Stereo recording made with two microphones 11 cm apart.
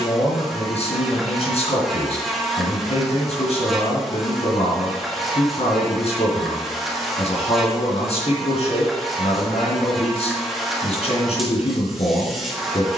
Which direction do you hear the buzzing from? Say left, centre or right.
centre.